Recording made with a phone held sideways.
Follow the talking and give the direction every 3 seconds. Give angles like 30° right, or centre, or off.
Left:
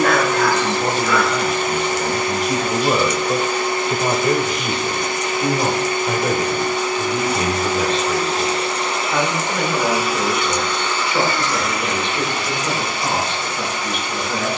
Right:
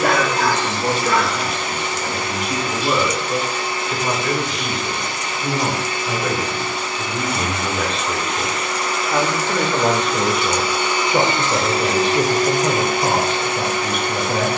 50° left, 30° left, 10° left, 30° right, 40° right.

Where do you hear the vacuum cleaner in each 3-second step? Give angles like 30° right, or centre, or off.
50° left, 50° left, 40° left, centre, 50° right.